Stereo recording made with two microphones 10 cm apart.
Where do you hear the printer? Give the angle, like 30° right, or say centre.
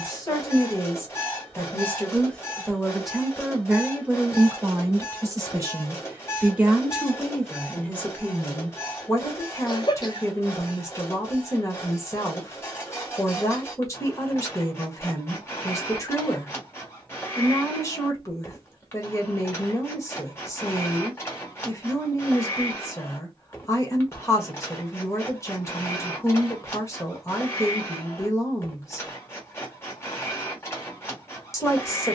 20° left.